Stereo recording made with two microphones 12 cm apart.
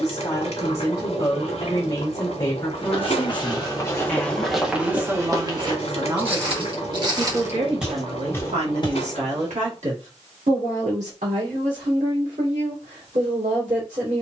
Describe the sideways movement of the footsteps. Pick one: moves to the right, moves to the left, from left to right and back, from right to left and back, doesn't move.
from left to right and back.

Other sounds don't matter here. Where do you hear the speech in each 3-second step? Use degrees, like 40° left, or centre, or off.
20° left, 10° right, 50° right, 70° right, 80° right.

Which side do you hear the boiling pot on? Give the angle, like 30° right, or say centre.
60° left.